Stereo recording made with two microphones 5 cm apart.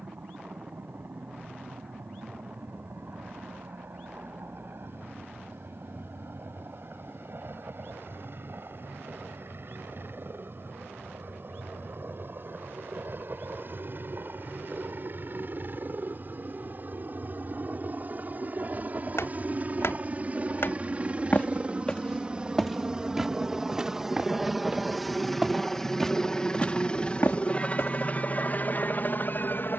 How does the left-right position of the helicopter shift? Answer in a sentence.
You can hear the helicopter travel towards the left.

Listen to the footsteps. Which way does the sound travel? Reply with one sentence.
In this clip you hear the footsteps move from left to right and back again.